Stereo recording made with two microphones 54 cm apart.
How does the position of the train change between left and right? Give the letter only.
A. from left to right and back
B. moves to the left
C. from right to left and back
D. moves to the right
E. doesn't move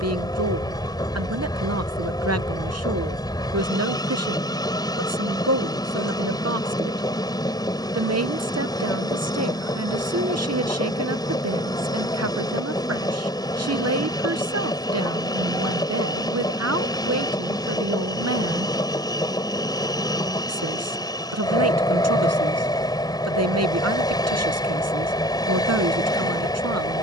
E.